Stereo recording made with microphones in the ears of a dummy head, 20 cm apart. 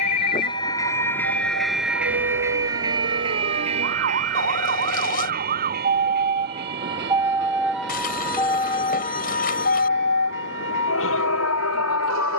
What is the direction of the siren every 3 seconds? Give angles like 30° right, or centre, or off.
60° right, 50° right, 10° right, 50° left.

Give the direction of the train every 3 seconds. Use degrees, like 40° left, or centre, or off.
centre, 30° right, 50° right, 60° right.